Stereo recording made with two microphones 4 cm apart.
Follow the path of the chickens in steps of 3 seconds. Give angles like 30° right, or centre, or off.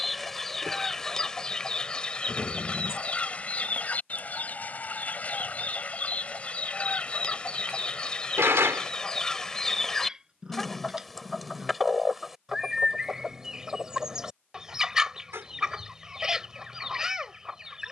20° left, 30° left, 20° left, 10° left, 10° right, 10° right.